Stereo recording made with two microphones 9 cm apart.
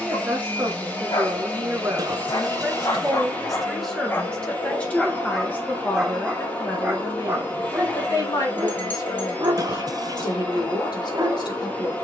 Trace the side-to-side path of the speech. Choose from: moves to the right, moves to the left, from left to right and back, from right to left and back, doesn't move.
moves to the left.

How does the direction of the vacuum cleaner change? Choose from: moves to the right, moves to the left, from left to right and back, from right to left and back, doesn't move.
doesn't move.